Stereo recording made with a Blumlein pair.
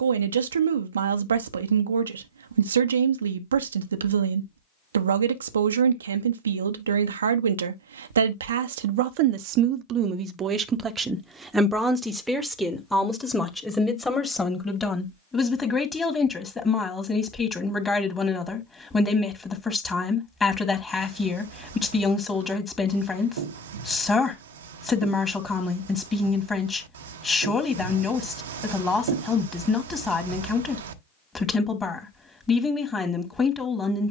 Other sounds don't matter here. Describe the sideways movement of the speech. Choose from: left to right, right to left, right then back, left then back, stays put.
right to left.